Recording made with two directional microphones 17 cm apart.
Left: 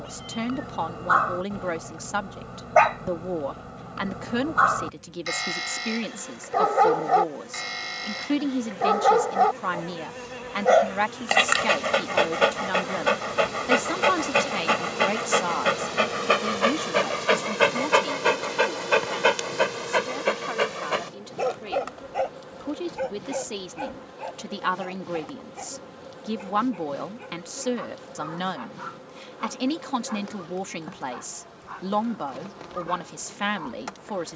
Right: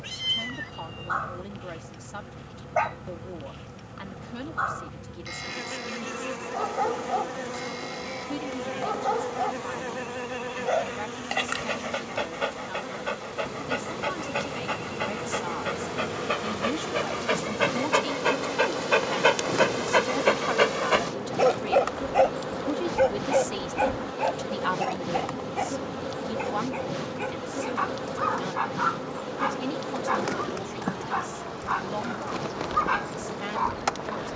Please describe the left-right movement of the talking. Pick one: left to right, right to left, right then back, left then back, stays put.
right then back.